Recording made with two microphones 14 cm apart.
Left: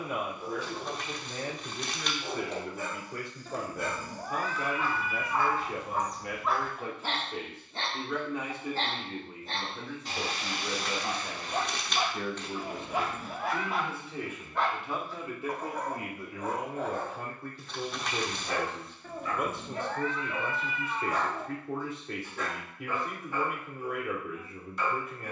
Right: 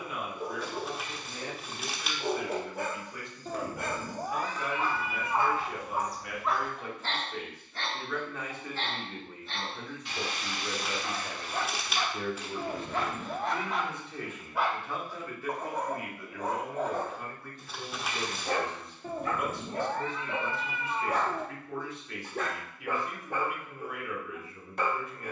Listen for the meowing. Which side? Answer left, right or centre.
right.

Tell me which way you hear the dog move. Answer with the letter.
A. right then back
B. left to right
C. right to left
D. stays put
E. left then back
E.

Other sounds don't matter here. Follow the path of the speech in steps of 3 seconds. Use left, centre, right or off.
left, left, left, centre, centre, left, left, left, left.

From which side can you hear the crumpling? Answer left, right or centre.
centre.